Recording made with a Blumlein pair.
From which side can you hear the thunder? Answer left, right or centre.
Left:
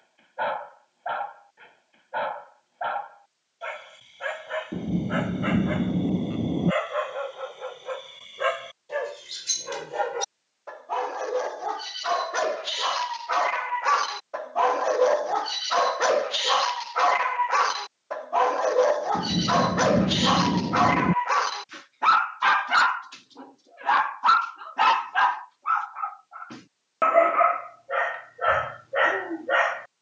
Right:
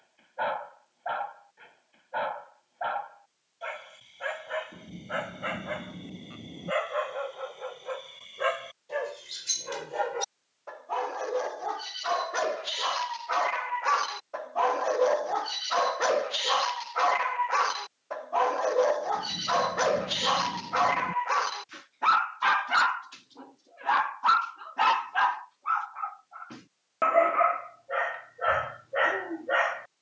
left.